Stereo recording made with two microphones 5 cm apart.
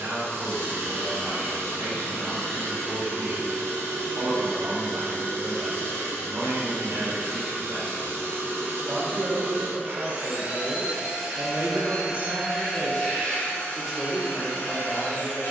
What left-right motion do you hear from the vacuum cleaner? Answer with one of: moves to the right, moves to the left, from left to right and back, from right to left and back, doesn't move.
moves to the left.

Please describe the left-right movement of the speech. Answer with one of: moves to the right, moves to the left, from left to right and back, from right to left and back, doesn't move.
moves to the left.